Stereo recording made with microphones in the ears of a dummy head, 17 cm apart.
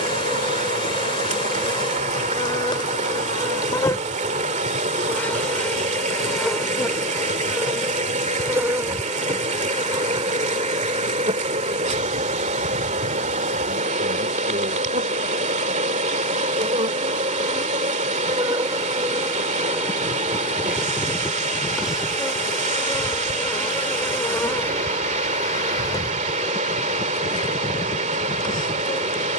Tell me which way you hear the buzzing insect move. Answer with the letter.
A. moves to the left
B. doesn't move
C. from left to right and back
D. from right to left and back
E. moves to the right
C.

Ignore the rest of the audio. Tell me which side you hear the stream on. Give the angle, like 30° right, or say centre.
40° right.